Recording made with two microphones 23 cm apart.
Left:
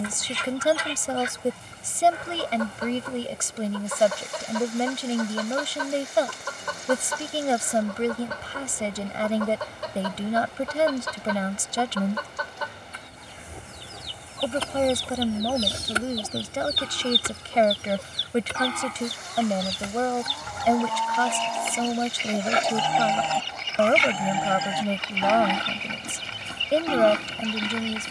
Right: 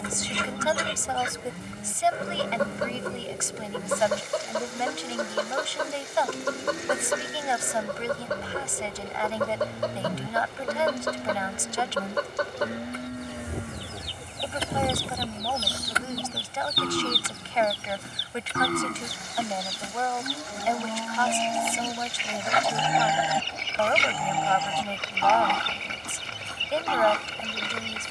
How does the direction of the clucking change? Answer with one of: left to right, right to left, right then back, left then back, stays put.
left then back.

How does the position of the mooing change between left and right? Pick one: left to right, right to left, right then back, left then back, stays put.
right to left.